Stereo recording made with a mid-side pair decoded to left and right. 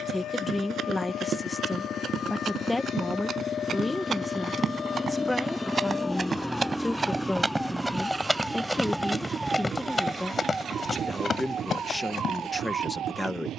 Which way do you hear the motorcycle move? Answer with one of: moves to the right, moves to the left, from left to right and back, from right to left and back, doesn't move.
moves to the right.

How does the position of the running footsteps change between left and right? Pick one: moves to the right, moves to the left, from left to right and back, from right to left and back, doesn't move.
moves to the left.